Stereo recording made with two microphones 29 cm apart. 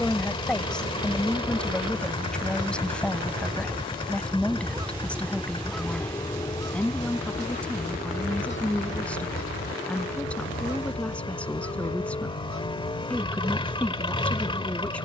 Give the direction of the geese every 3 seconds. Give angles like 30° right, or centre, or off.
50° right, 20° right, 30° left, 50° left, 70° left.